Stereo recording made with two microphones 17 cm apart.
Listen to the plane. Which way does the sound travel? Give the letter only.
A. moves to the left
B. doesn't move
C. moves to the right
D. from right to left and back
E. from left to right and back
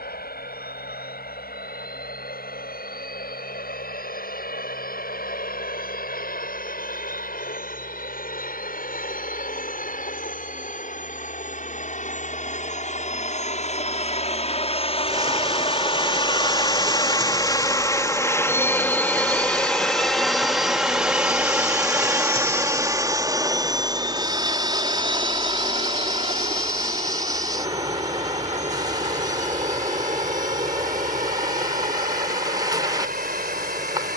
C.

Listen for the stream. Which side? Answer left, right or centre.
right.